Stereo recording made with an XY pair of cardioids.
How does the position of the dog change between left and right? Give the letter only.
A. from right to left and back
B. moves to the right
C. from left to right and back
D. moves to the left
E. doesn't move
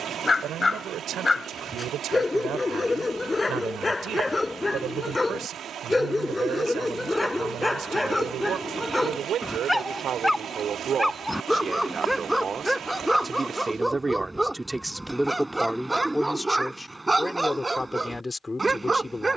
B.